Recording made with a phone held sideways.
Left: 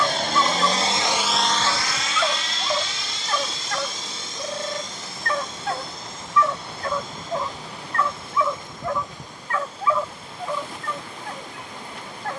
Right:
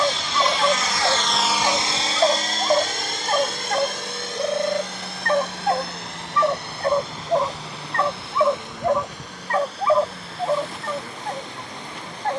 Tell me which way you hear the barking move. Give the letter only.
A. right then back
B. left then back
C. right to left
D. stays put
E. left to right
D.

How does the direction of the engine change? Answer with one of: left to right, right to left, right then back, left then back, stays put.
left to right.